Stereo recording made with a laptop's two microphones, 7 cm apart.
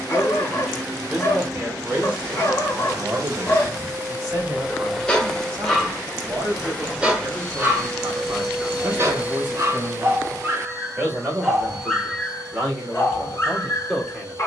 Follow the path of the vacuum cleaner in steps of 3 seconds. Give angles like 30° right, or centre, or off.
60° right, 20° right, centre, 40° right, 60° right.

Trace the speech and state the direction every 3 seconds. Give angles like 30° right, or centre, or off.
10° right, 30° right, 40° right, 30° right, 10° right.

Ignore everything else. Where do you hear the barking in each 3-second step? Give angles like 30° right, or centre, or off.
40° left, 10° left, 20° right, 30° right, 30° left.